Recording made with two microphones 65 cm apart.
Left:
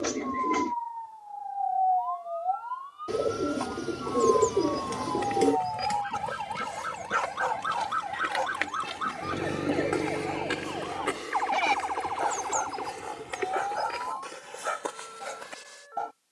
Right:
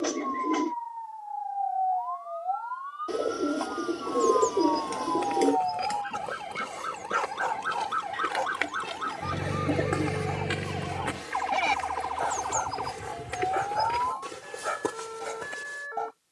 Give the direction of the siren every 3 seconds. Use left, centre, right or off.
left, left, centre, right, right, right.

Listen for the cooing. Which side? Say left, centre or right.
left.